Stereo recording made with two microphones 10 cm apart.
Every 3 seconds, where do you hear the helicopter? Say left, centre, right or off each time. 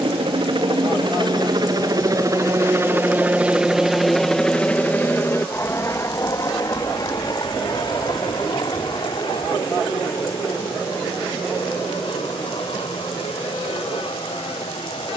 right, centre, left, left, left.